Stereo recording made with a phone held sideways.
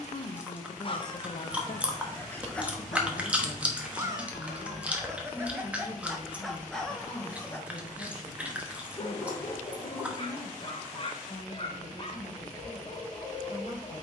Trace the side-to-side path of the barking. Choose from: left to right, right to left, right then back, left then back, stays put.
right then back.